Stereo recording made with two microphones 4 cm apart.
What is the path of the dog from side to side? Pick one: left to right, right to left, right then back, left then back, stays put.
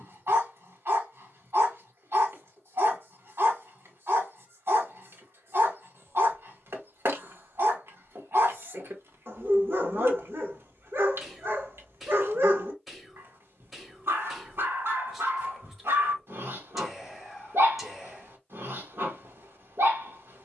stays put.